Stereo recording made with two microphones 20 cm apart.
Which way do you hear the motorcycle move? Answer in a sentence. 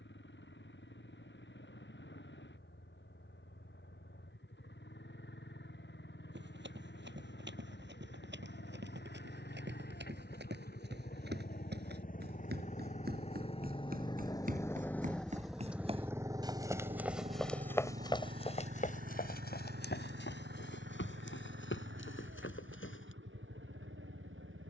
You can hear the motorcycle move from left to right.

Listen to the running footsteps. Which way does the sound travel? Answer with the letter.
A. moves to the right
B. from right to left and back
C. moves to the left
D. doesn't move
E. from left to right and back
C.